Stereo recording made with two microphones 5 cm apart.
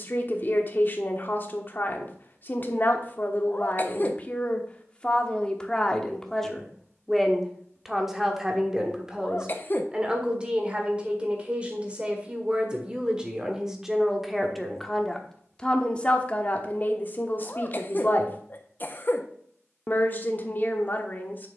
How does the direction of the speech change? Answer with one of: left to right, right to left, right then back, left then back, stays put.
right then back.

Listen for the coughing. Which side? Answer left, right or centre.
left.